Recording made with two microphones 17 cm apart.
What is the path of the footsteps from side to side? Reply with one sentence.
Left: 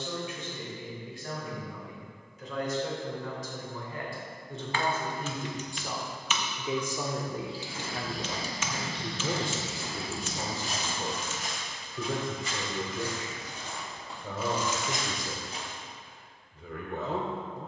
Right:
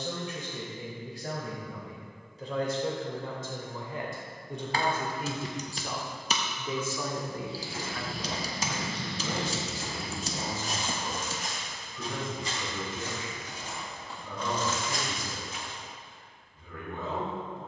In this clip you hear the footsteps move to the left.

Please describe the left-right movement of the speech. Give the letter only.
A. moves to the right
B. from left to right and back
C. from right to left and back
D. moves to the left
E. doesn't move
D.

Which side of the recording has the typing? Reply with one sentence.
In this clip you hear the typing on the right.